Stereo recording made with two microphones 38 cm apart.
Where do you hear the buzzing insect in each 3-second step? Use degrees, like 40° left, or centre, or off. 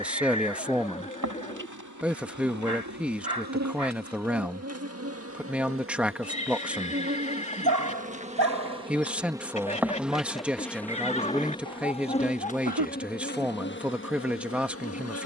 50° right, 40° right, 20° right, centre, 30° left.